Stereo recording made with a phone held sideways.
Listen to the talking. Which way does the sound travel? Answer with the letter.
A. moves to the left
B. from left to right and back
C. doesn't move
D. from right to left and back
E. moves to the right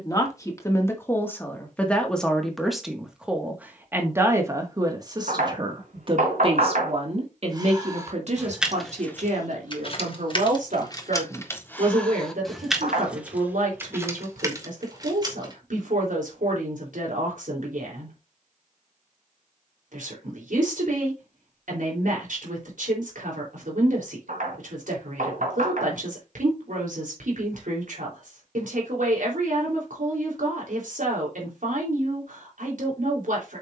E.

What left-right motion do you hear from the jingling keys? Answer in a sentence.
You can hear the jingling keys go left and come back.